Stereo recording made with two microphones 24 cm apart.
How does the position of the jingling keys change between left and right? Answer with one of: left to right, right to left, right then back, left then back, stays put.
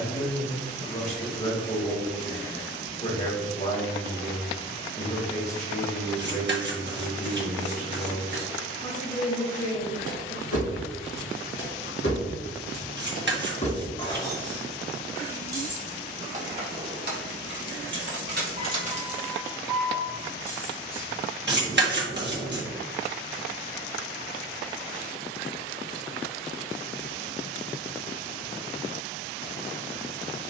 right then back.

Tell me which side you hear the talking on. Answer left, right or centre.
left.